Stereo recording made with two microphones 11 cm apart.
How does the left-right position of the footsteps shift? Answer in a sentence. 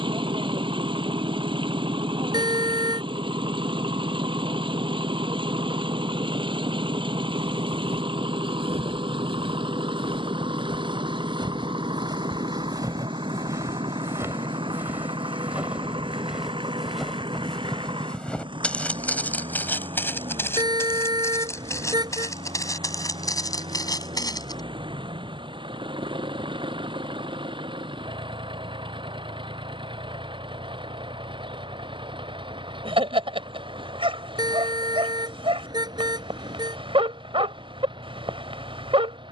In this clip you hear the footsteps move from right to left.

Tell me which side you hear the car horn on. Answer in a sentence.
In this clip you hear the car horn on the right.